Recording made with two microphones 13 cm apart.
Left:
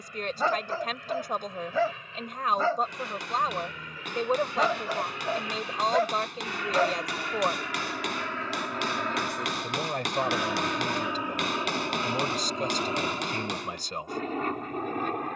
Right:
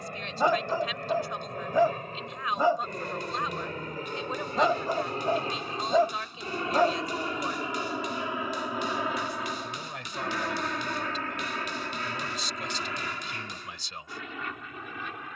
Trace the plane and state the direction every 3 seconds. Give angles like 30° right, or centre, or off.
50° right, 40° right, 20° right, 10° left, 30° left.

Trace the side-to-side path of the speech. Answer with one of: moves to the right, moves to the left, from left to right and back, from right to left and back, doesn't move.
doesn't move.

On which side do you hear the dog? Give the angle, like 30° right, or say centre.
20° right.